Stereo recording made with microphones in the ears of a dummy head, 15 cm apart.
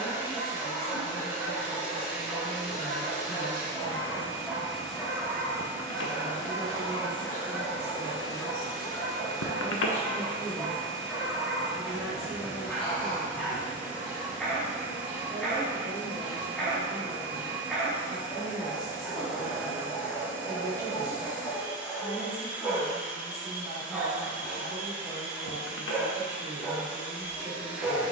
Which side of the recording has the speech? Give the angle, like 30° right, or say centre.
20° right.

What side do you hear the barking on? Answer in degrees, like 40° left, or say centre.
centre.